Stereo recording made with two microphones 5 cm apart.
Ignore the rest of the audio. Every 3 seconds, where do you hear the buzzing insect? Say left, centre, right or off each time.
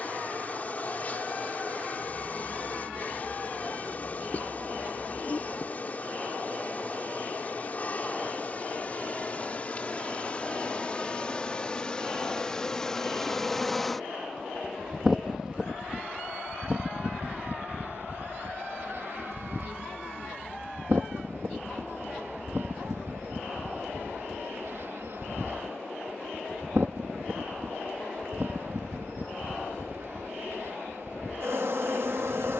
left, left, left, left, centre, right, right, right, right, right, right.